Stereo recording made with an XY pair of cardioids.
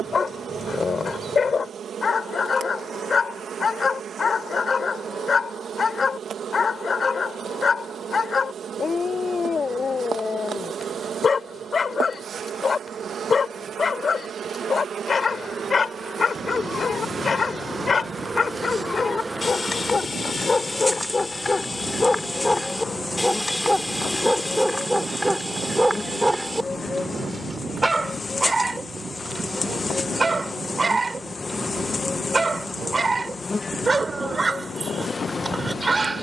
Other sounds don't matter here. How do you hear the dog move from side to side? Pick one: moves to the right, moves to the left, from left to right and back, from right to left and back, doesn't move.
moves to the right.